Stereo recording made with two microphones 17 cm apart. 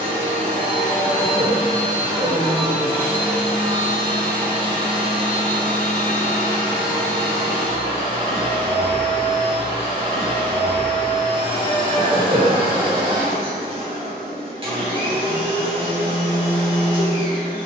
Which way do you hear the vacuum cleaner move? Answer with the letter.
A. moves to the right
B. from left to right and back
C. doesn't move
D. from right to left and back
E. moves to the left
C.